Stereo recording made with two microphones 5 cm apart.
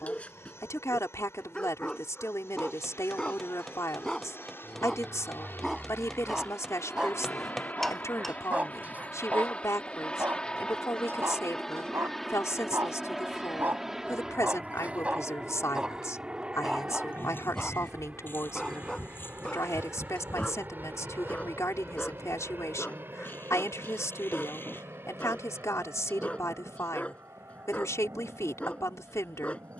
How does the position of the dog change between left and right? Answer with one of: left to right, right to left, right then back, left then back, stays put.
right then back.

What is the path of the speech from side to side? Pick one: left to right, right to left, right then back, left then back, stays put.
stays put.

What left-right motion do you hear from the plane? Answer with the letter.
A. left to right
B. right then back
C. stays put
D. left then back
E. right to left
A.